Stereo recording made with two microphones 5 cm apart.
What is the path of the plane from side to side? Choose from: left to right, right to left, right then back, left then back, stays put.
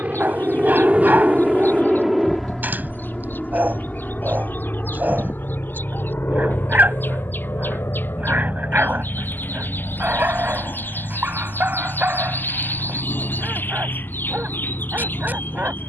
right to left.